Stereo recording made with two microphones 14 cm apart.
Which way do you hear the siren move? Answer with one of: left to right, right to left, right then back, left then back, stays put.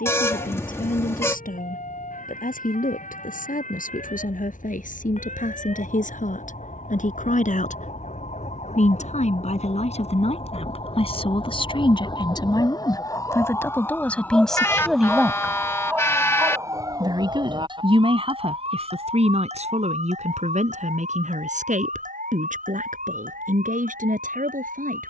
left to right.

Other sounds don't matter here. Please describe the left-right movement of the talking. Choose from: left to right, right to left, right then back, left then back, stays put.
left to right.